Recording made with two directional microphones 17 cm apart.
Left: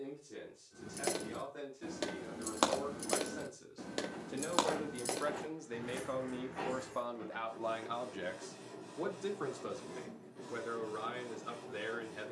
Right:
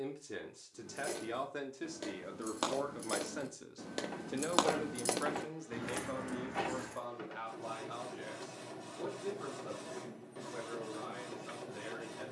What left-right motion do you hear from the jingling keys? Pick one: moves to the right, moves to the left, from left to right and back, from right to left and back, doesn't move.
moves to the right.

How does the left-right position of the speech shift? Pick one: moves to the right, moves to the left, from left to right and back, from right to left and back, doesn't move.
moves to the left.